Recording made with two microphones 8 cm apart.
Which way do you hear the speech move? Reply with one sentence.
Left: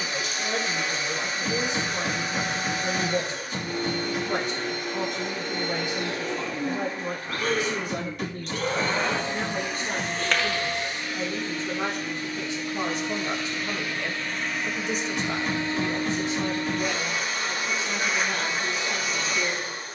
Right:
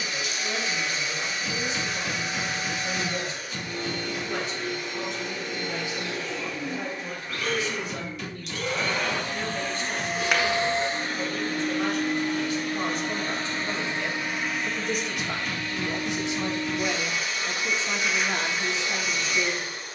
You can hear the speech go from the left side to the right.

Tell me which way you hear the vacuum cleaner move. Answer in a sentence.
You can hear the vacuum cleaner move from left to right and back again.